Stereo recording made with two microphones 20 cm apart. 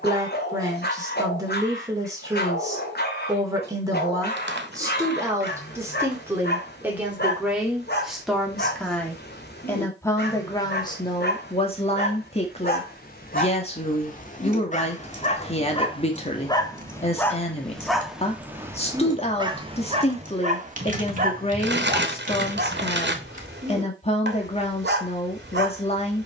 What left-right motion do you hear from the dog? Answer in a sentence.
In this clip you hear the dog go from the left side to the right.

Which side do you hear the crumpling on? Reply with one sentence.
In this clip you hear the crumpling on the right.